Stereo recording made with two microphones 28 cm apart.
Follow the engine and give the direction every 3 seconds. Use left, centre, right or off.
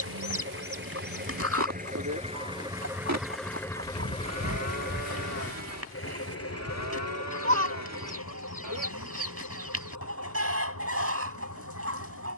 right, left, left, left.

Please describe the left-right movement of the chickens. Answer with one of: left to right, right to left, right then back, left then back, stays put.
stays put.